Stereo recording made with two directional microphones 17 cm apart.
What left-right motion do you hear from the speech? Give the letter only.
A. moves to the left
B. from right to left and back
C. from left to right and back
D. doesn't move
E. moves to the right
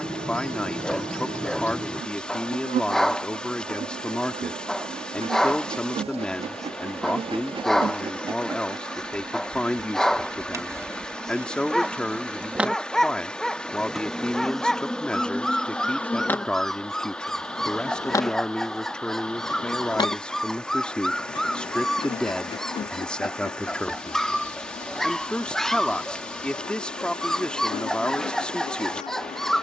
D.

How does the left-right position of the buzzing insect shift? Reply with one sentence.
In this clip you hear the buzzing insect go from the right side to the left.